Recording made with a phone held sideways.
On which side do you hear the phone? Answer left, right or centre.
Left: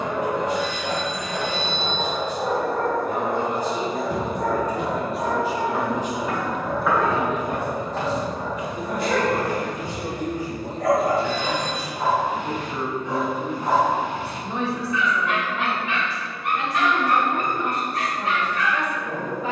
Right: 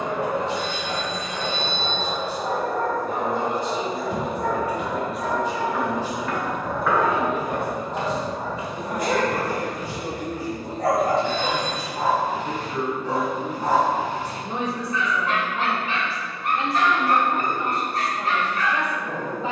right.